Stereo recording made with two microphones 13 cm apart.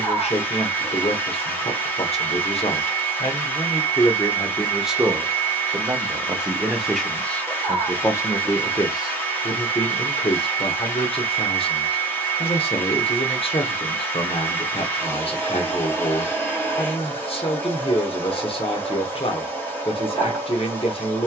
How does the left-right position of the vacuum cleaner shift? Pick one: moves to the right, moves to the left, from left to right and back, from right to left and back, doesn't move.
doesn't move.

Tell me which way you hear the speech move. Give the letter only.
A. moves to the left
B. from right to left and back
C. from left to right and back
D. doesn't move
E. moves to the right
C.